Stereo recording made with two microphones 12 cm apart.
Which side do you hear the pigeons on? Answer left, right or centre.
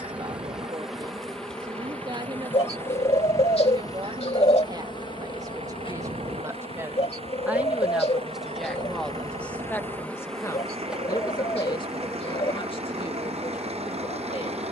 left.